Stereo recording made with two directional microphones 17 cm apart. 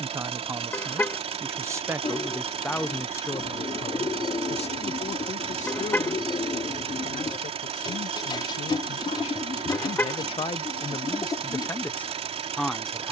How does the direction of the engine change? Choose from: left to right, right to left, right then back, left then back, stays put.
stays put.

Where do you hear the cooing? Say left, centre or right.
left.